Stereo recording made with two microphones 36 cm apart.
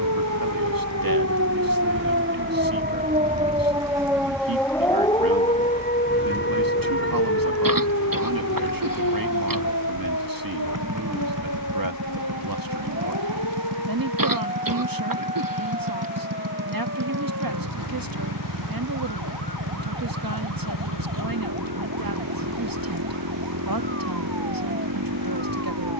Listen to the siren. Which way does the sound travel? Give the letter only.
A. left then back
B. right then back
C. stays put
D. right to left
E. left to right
D.